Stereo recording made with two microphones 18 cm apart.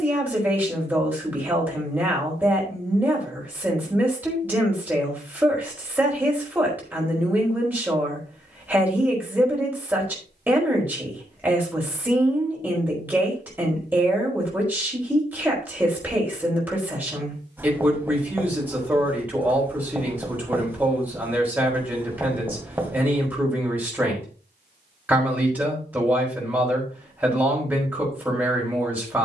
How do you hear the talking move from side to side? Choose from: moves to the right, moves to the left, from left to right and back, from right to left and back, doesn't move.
doesn't move.